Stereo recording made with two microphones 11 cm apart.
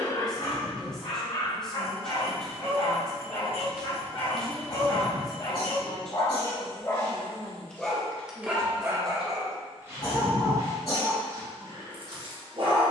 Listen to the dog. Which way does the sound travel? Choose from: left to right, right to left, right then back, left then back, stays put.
left to right.